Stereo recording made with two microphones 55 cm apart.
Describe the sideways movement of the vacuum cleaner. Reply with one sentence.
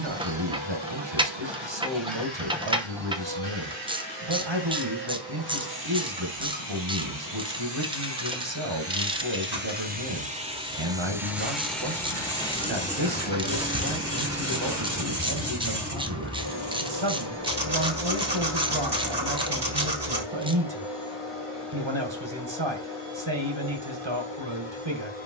You can hear the vacuum cleaner move to the left.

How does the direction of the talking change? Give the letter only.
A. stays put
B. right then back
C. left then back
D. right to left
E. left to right
A.